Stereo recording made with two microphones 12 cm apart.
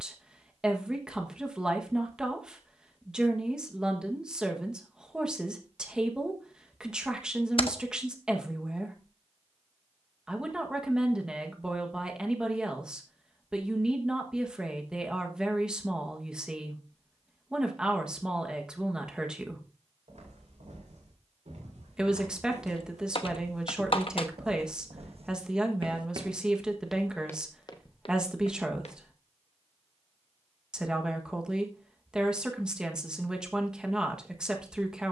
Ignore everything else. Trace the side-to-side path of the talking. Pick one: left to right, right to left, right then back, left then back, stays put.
stays put.